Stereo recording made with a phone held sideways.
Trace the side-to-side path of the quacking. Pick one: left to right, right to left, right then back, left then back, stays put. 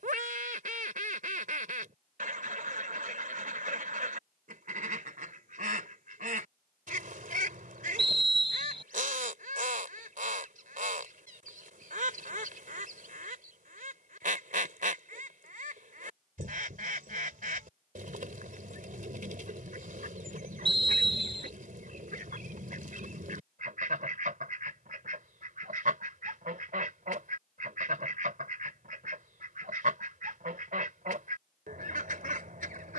stays put.